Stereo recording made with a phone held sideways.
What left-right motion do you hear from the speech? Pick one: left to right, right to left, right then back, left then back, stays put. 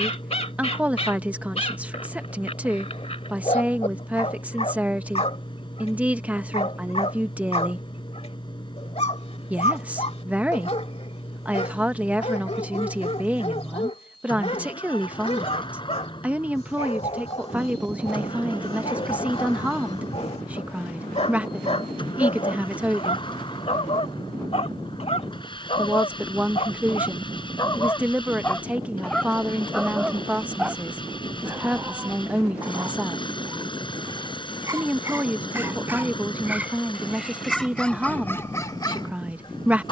stays put.